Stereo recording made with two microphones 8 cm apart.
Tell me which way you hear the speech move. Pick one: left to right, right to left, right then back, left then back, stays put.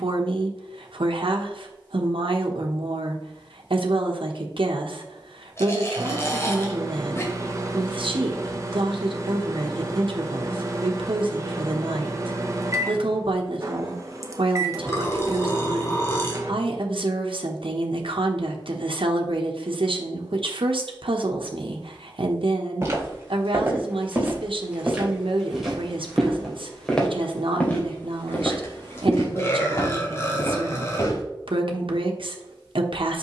stays put.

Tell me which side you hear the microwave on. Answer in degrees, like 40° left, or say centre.
40° right.